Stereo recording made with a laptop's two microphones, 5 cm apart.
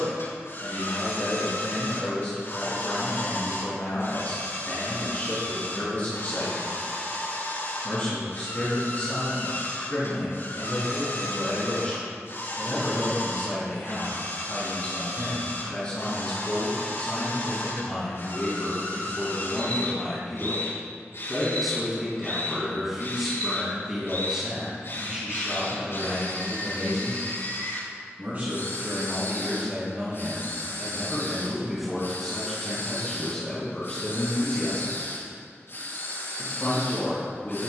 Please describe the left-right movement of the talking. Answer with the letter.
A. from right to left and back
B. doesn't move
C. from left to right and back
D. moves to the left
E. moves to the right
C.